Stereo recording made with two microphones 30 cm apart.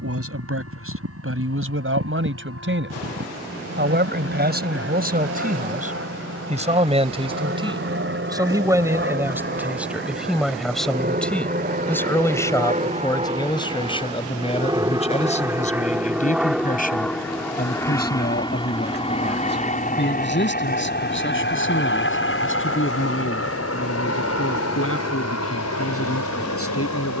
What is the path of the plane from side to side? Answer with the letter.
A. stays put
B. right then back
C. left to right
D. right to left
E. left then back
D.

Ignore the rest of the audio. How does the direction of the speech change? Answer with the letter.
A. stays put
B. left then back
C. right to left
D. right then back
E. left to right
C.